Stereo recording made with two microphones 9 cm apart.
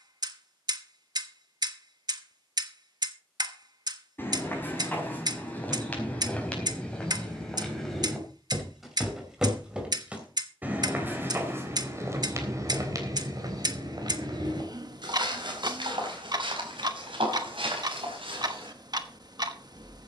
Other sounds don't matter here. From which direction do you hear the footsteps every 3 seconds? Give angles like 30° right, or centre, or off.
off, 20° left, 10° left, 20° right, 40° right, 70° right, 80° right.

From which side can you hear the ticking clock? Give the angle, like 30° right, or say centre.
50° right.